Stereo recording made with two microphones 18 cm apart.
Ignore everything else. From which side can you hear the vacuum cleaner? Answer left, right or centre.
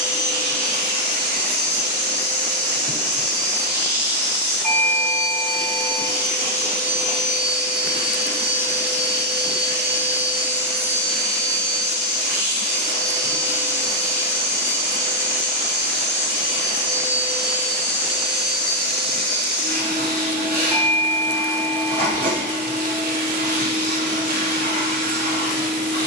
right.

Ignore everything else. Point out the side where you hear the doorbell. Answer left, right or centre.
centre.